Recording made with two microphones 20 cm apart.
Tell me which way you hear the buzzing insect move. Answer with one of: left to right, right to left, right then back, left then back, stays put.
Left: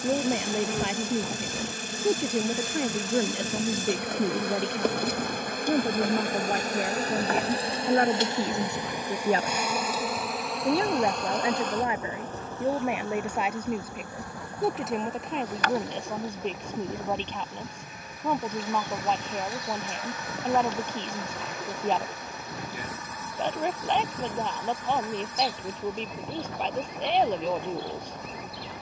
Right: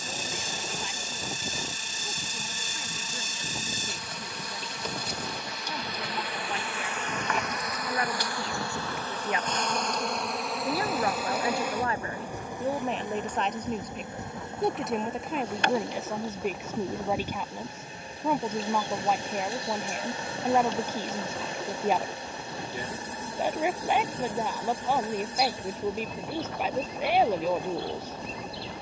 left to right.